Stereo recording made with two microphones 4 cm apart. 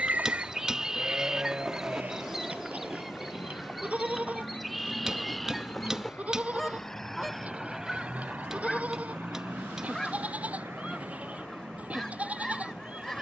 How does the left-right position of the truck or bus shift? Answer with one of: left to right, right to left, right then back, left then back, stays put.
left to right.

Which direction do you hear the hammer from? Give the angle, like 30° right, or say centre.
20° right.